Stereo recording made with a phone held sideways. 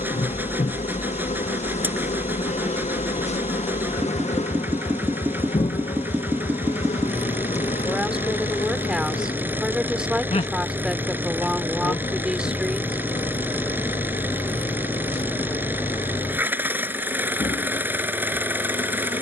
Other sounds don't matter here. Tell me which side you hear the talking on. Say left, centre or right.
centre.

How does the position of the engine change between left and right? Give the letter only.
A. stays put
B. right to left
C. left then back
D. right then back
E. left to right
A.